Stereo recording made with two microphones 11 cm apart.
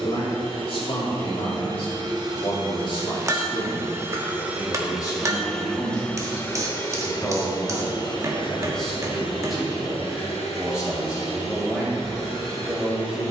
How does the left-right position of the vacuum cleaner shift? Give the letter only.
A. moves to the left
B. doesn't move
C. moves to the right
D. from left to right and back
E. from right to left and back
A.